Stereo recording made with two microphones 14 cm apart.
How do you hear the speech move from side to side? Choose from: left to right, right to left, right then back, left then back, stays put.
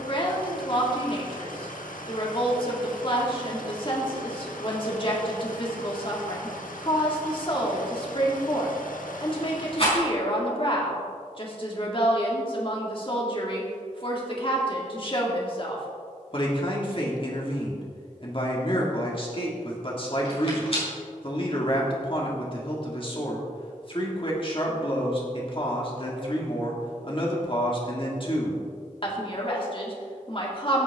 stays put.